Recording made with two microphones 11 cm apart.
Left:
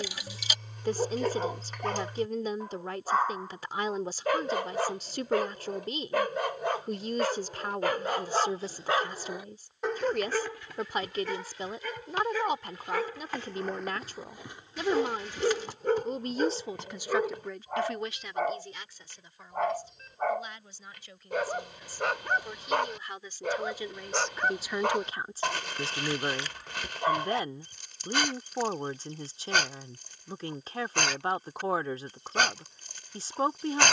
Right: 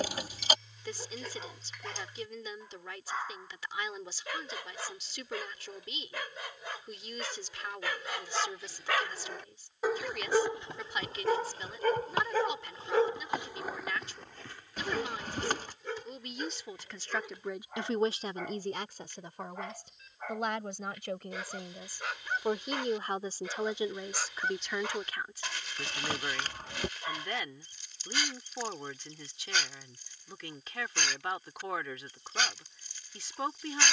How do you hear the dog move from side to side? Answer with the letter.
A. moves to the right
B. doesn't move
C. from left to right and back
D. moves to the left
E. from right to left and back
C.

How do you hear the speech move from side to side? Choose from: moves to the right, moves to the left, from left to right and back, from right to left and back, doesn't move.
from left to right and back.